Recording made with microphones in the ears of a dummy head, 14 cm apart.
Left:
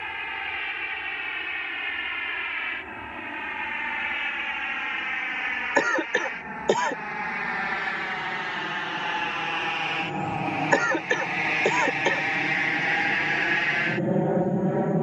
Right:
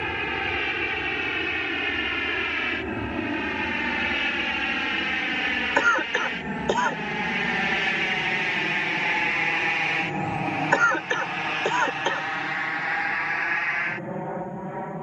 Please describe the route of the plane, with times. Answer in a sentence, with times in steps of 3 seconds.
You can hear the plane on the right from 0 s, in the centre from 9 s and on the left from 12 s.